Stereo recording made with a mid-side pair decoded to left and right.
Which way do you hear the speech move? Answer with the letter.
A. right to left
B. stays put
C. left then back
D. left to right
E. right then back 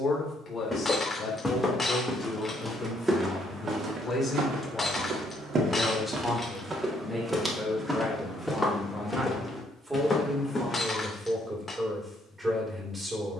D.